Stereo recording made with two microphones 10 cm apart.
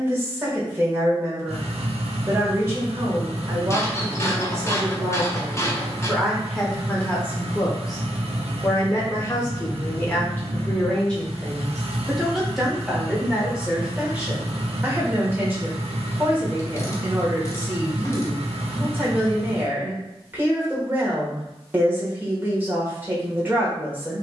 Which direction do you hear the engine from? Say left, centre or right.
right.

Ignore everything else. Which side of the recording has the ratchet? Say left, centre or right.
left.